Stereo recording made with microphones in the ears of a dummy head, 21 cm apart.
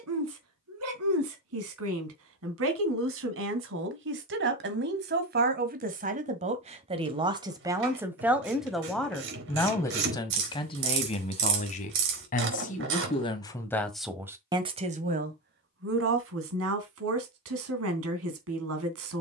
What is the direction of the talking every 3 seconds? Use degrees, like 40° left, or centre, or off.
70° right, 50° right, 20° right, 20° left, 10° left, 60° right, 60° right.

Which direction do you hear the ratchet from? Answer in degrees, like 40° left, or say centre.
50° right.